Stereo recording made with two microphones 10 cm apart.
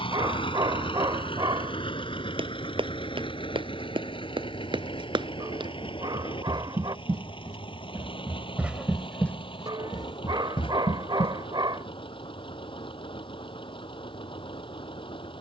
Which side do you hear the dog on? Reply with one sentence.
You can hear the dog on the right.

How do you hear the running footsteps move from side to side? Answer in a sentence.
In this clip you hear the running footsteps move from right to left.